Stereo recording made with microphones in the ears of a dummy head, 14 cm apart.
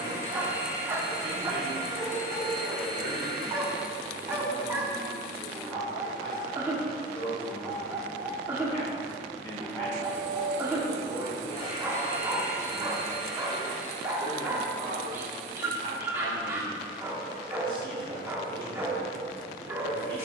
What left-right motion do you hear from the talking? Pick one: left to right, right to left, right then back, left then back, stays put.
left then back.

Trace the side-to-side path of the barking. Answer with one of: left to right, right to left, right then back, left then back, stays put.
stays put.